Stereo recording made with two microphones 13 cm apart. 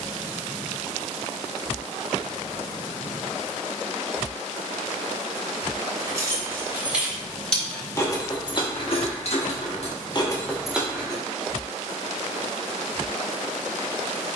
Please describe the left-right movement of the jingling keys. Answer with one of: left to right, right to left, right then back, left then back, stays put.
left then back.